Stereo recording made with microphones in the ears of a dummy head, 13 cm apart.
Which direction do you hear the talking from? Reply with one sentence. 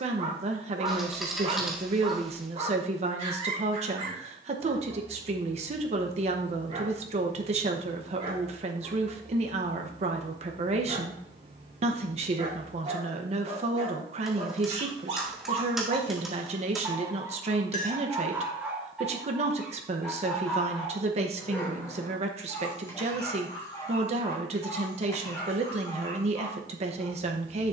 In this clip you hear the talking on the right.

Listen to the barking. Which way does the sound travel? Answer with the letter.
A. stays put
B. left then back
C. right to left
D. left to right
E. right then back
C.